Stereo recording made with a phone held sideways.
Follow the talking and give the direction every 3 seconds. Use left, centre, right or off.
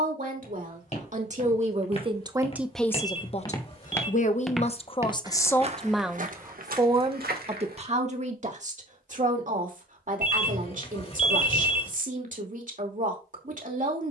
right, left, right, right, right.